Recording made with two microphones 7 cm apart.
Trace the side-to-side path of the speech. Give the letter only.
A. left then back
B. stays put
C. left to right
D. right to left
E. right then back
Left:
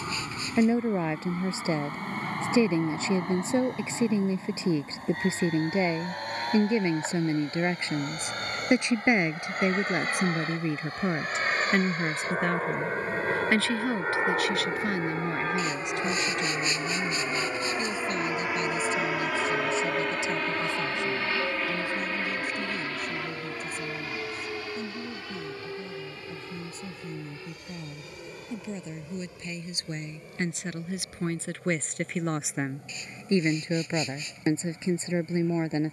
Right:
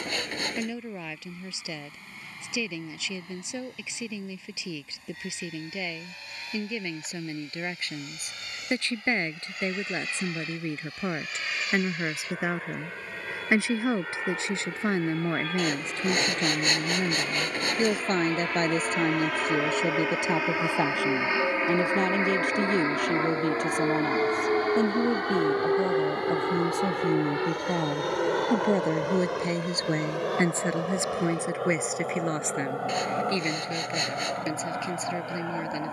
E.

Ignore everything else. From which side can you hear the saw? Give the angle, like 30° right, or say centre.
60° right.